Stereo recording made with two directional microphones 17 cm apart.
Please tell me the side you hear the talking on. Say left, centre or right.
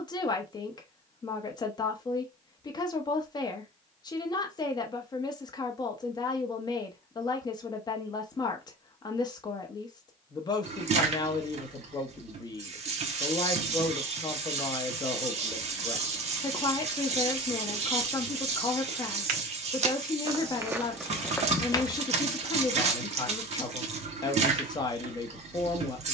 left.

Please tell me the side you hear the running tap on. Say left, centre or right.
right.